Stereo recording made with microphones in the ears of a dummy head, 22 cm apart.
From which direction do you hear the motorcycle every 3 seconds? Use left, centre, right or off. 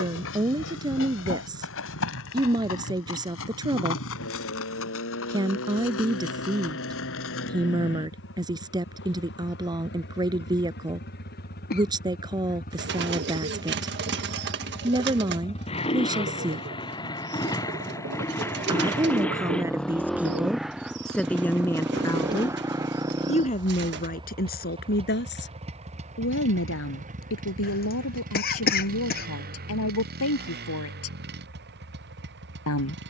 left, left, left, left, left, left, centre, centre, right, right, right.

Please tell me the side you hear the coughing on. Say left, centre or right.
left.